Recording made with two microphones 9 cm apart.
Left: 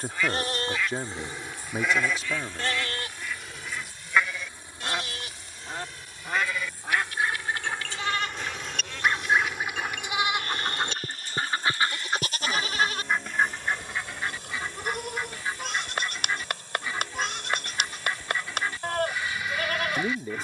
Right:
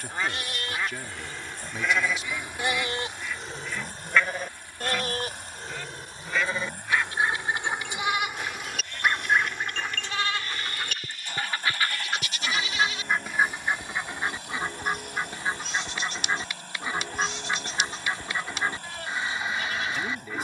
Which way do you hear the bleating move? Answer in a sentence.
You can hear the bleating move from left to right and back again.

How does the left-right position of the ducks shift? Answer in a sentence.
In this clip you hear the ducks move from right to left and back again.